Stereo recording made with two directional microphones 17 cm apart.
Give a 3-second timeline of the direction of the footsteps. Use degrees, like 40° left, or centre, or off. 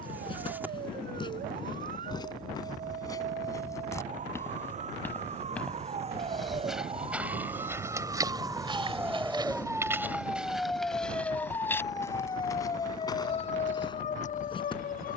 30° left, 10° left, 10° right, 10° right, 20° left.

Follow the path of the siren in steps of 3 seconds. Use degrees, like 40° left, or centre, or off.
50° right, 40° right, 30° right, centre, 40° left.